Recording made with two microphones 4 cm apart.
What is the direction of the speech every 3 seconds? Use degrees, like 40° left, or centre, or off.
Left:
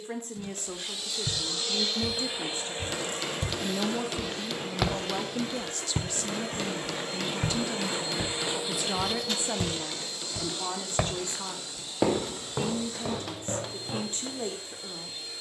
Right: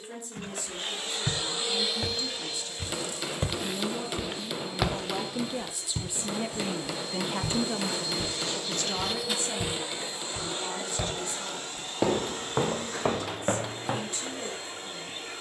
50° left, 10° left, 20° right, 40° left, 50° left.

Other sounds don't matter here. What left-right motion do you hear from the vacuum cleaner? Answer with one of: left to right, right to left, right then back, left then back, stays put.
left then back.